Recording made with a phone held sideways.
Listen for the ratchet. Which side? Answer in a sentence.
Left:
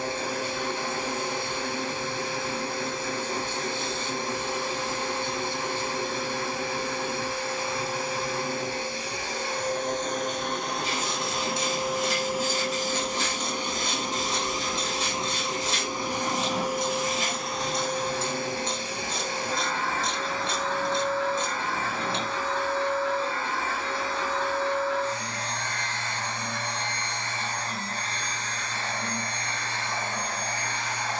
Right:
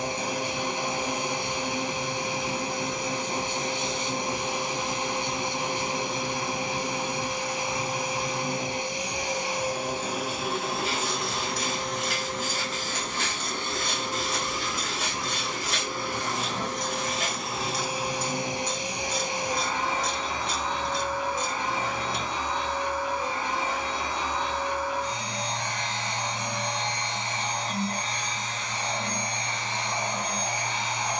You can hear the ratchet on the left.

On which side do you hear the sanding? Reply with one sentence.
In this clip you hear the sanding on the right.